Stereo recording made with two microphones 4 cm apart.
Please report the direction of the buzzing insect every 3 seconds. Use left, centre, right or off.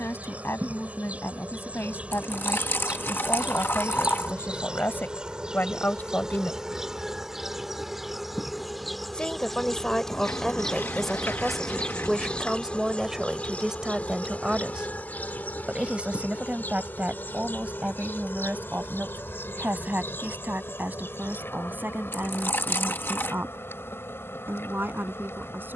right, right, centre, centre, left, left, left, left, left.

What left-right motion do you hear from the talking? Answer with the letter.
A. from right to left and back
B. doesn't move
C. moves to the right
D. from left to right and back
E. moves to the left
C.